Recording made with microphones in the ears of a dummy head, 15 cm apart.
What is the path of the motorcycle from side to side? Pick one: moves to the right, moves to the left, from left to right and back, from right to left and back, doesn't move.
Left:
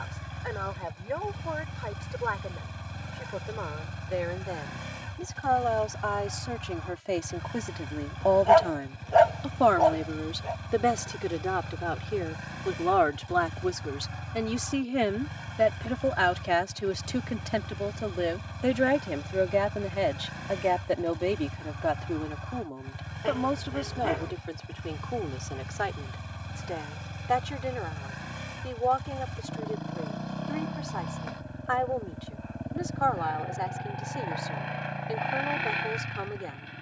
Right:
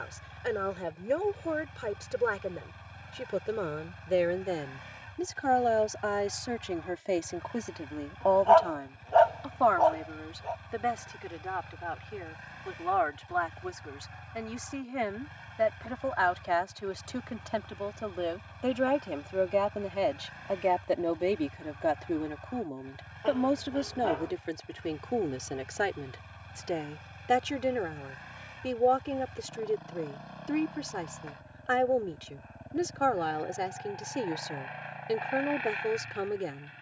doesn't move.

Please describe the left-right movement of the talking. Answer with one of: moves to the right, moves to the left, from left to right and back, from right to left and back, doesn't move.
from right to left and back.